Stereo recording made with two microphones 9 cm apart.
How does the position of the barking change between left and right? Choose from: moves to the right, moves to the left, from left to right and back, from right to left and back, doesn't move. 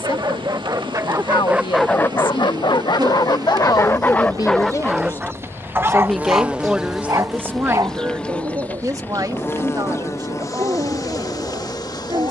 from right to left and back.